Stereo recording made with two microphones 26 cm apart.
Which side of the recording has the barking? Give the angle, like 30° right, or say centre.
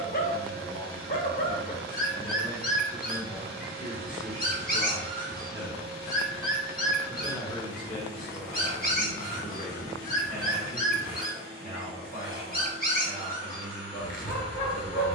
30° left.